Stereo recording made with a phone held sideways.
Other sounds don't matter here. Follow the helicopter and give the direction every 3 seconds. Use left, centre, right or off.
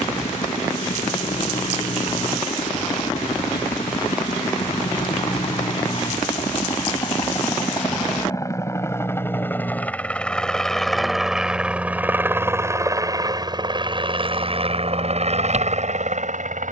left, left, left, centre, right, right.